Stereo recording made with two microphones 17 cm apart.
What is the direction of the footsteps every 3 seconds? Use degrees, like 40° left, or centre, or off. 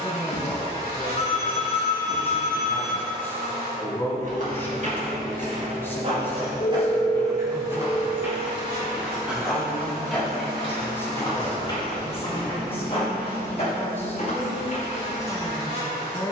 off, 40° right, 20° right, 10° left, 40° left, off.